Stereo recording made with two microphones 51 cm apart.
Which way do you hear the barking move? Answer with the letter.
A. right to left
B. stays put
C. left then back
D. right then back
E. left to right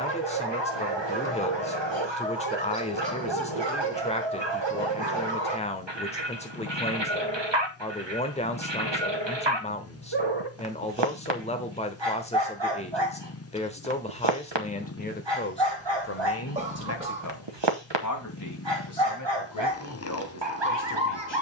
B.